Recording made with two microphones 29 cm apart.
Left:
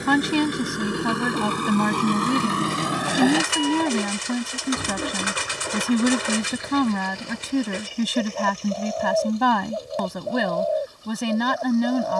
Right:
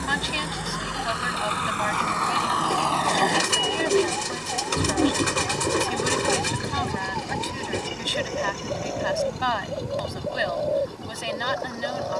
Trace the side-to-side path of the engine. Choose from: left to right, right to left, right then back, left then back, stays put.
left to right.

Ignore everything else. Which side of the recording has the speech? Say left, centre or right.
left.